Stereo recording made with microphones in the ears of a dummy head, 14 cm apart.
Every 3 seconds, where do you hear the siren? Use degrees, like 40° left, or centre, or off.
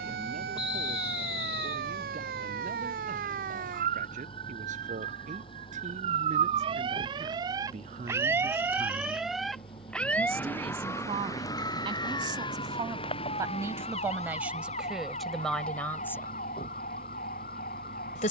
70° right, 50° right, 30° right, 10° left, 40° left, 50° left.